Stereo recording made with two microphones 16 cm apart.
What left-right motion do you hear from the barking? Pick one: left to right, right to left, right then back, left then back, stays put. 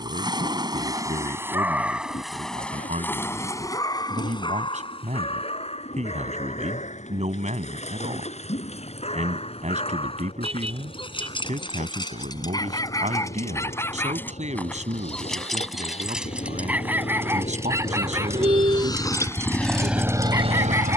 left then back.